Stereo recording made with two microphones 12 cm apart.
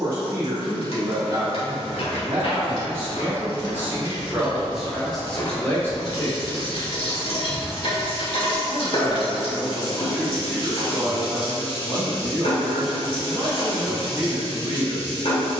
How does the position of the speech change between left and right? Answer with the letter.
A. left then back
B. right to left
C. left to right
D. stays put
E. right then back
A.